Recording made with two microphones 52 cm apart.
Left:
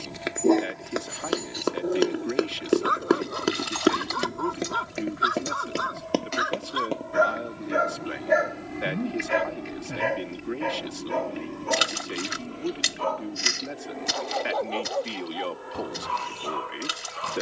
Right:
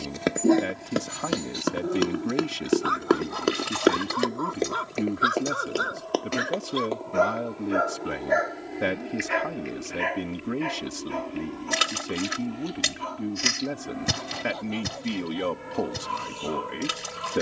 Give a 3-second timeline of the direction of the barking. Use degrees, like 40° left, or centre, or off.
30° right, 10° left, 40° left, 60° left, 70° left, 70° left.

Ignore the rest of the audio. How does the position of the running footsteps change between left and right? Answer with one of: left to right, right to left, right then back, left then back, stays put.
right to left.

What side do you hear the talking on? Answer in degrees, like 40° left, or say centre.
60° right.